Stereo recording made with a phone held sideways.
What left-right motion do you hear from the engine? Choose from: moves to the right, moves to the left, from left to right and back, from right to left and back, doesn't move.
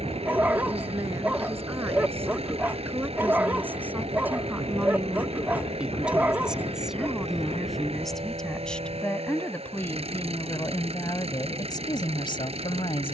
doesn't move.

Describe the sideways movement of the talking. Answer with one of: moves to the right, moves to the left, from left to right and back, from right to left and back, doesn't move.
moves to the left.